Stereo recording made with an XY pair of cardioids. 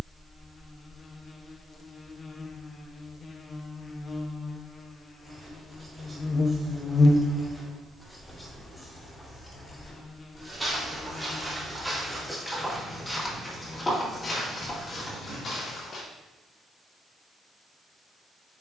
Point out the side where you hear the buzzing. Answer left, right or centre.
left.